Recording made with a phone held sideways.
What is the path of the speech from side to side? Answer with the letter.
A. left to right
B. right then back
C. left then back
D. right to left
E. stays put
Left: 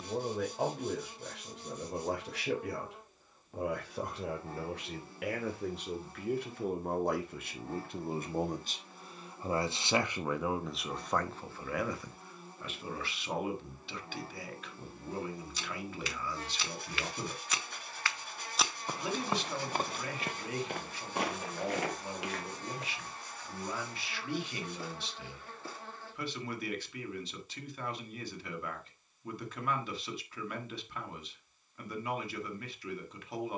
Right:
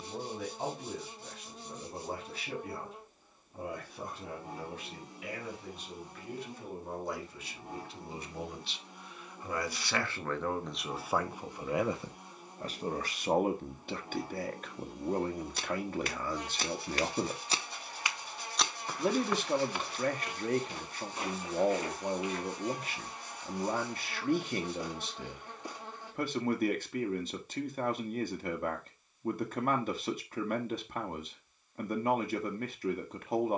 A.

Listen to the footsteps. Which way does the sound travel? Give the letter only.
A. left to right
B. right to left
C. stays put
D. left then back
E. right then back
B.